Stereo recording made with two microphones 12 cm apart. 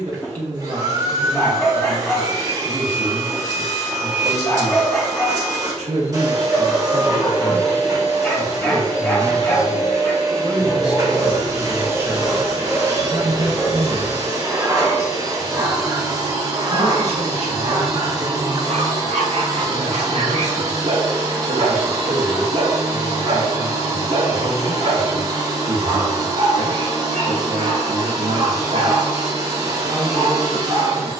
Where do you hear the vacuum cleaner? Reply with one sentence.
In this clip you hear the vacuum cleaner on the right.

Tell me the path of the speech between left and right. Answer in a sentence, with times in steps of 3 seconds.
You can hear the speech on the right from 0 s, in the centre from 9 s and on the right from 12 s.